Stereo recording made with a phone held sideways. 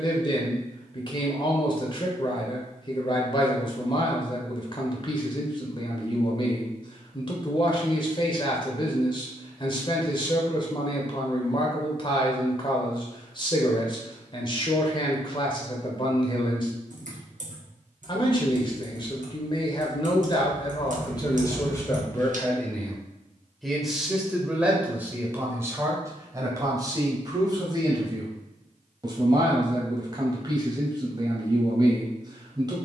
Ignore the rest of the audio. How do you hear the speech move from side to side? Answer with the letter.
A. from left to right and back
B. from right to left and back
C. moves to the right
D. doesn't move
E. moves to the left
C.